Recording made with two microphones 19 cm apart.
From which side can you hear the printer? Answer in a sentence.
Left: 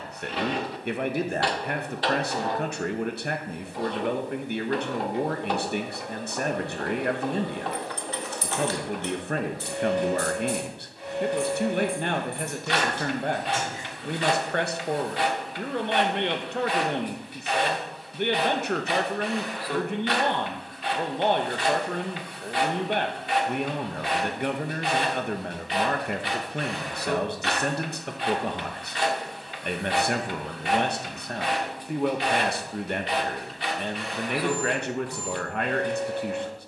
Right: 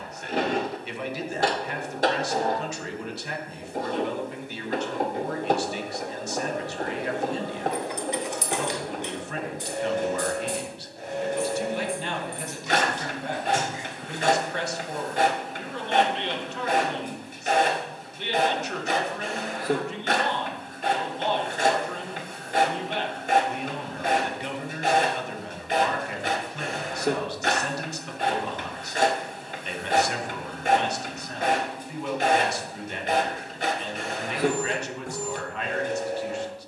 In this clip you hear the printer on the right.